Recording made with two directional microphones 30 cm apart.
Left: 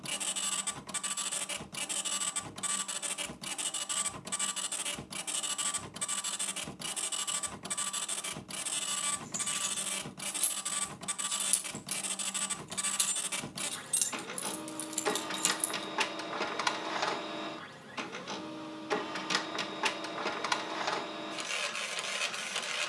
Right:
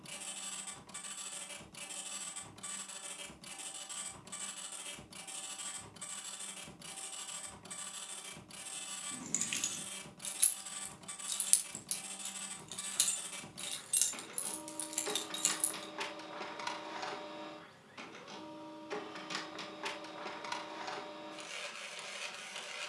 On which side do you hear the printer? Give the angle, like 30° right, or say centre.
60° left.